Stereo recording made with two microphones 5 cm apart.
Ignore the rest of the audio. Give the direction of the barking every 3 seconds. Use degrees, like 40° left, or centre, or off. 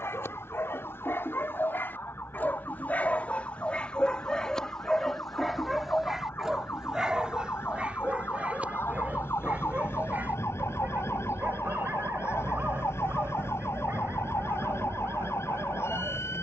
50° left, 10° left, 20° right, 40° right, 50° right, 50° right.